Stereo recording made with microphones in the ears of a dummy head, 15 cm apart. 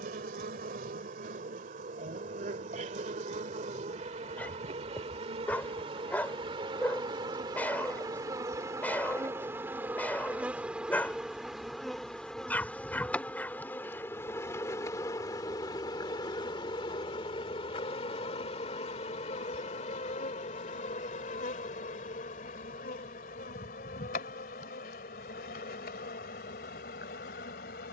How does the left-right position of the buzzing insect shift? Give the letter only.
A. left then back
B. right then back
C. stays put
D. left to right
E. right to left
E.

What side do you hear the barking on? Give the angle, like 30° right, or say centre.
10° left.